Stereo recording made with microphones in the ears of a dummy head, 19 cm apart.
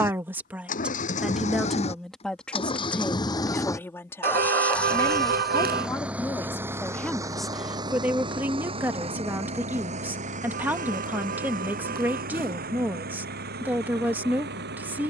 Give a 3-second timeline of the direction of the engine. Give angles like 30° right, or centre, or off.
30° left, 10° left, 20° right, 40° right, 50° right.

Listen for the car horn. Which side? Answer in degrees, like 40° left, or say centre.
50° right.